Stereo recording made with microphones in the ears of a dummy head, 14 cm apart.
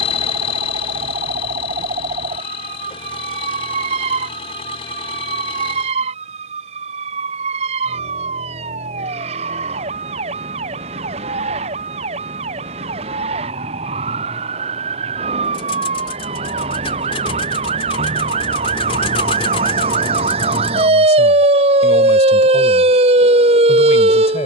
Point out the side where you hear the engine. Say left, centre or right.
left.